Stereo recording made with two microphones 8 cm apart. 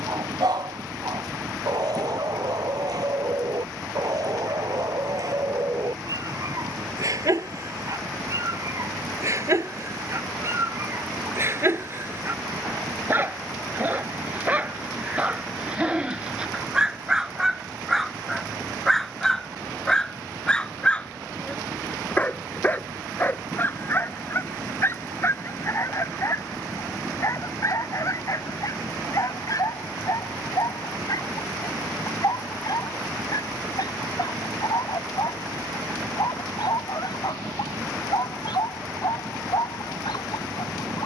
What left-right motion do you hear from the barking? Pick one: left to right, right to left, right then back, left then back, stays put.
right to left.